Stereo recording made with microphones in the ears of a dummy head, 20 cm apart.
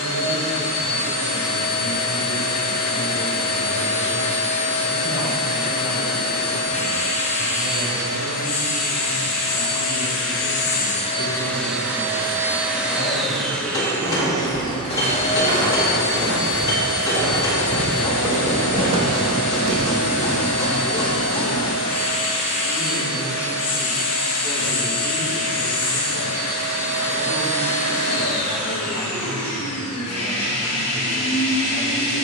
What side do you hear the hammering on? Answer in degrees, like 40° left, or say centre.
20° left.